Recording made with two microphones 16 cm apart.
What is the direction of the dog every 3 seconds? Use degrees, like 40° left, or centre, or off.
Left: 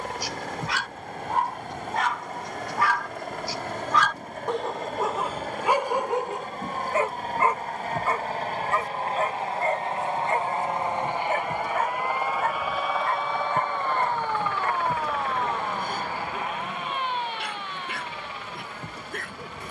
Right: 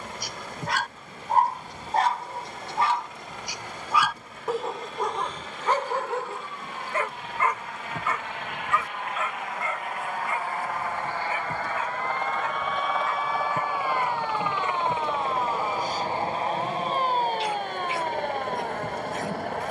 40° right, centre, 30° left, 40° left, 50° left, 60° left, 60° left.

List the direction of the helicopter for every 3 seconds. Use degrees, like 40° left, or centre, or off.
60° left, 50° left, 40° left, 20° left, 10° right, 30° right, 50° right.